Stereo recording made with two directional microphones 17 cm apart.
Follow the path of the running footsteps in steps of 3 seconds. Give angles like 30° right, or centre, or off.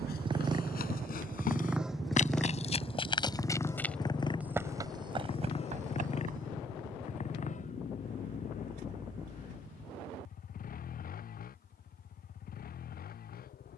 50° left, 10° right, 50° right, off, off.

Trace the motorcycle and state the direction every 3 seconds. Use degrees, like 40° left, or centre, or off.
10° right, 30° left, 40° left, 50° left, 50° left.